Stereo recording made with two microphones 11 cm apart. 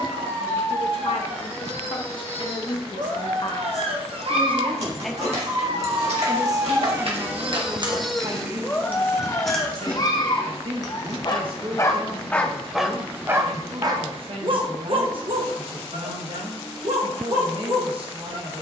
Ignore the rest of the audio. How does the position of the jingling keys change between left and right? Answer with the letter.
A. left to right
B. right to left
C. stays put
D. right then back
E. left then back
B.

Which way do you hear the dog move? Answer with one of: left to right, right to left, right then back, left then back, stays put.
left then back.